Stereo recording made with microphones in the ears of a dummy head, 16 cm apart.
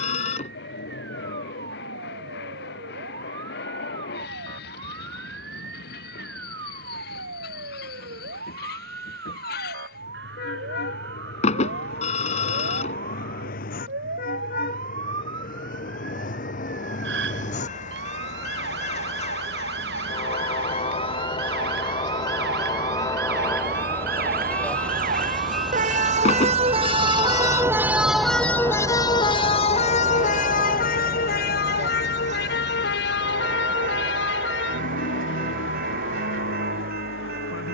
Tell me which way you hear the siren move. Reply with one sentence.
You can hear the siren move to the left.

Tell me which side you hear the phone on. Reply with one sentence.
You can hear the phone on the left.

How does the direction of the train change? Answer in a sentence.
You can hear the train move from left to right.